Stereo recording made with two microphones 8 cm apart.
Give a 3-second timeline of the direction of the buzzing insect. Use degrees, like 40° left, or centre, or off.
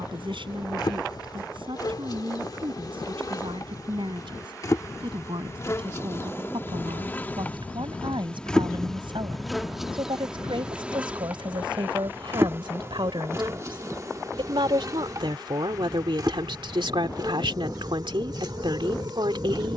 50° left, 40° left, 20° left, 10° right, 40° right, 50° right, 60° right.